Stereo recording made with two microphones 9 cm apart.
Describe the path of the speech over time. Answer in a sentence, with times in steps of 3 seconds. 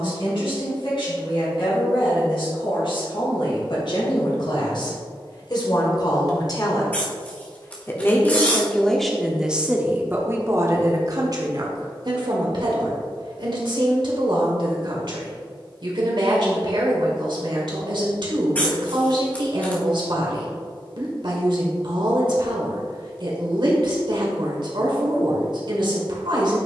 In this clip you hear the speech on the left from 0 s and on the right from 9 s.